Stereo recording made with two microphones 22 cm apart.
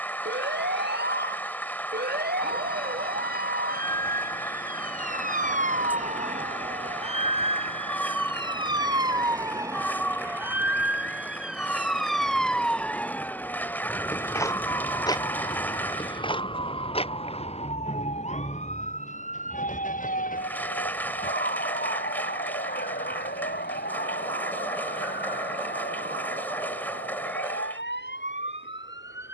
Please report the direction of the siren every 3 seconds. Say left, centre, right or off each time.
right, right, right, centre, centre, left, left, left, left, left.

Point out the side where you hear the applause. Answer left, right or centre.
centre.